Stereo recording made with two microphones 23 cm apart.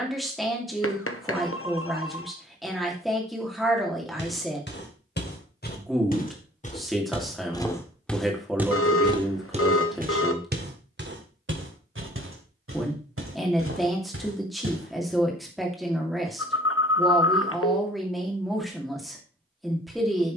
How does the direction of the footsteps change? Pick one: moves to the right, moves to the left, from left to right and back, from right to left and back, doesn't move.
moves to the right.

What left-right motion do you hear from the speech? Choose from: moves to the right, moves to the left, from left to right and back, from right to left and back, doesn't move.
doesn't move.